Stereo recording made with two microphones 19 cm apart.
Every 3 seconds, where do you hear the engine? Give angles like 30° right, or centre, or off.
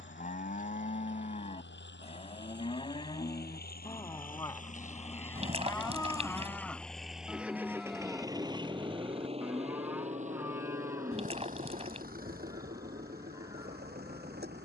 70° left, 40° left, 10° right, 40° right, 50° right.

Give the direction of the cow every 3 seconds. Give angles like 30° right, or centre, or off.
40° left, 20° left, centre, 10° right, 20° right.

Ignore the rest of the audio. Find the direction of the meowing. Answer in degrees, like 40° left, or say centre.
30° right.